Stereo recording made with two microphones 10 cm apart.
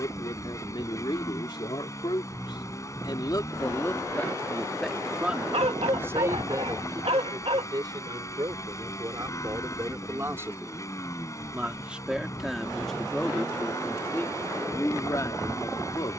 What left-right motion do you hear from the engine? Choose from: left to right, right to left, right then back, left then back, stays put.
stays put.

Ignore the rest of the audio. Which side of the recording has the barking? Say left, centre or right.
right.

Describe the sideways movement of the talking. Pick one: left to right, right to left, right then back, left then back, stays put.
right then back.